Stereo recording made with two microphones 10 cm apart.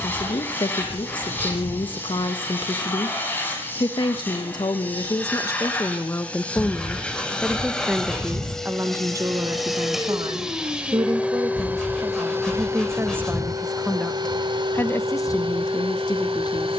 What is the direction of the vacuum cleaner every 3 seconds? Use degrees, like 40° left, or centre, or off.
20° left, 20° left, 10° left, 10° right, 40° right, 60° right.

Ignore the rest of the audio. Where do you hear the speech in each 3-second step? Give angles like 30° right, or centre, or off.
50° left, 40° left, centre, 40° right, 10° right, 40° left.